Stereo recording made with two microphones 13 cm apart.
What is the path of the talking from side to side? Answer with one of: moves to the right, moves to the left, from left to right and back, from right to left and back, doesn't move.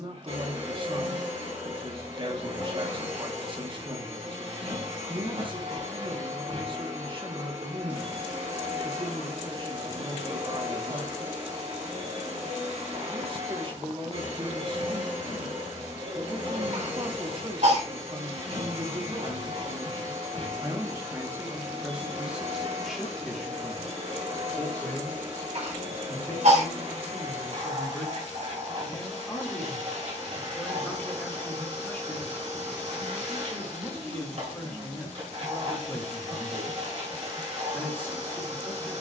moves to the left.